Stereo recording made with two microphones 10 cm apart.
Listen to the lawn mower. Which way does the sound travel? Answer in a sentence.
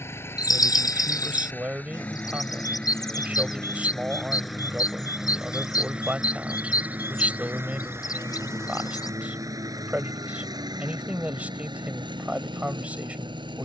You can hear the lawn mower travel towards the right.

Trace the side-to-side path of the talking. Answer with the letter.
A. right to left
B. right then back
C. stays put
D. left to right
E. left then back
C.